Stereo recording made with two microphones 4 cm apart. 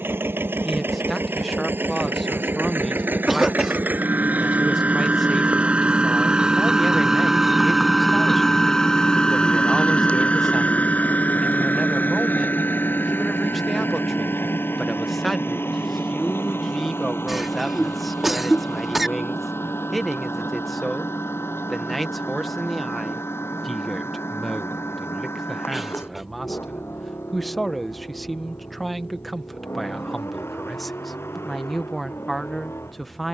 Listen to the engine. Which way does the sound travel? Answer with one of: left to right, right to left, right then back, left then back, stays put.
right to left.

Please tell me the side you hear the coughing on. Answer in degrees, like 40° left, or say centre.
10° right.